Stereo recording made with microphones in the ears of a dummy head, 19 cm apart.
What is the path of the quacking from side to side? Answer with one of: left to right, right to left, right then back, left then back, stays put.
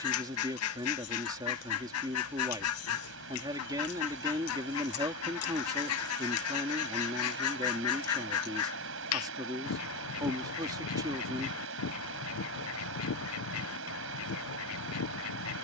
stays put.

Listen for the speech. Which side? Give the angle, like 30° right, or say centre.
20° right.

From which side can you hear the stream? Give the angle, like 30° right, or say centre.
70° right.